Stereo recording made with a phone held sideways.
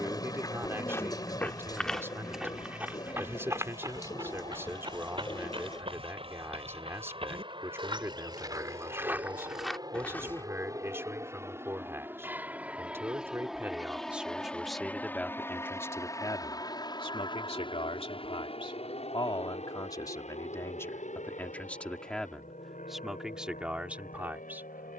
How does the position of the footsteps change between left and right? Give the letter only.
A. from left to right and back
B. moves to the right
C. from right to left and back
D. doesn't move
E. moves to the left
A.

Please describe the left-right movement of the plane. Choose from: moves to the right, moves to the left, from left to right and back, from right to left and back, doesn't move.
moves to the left.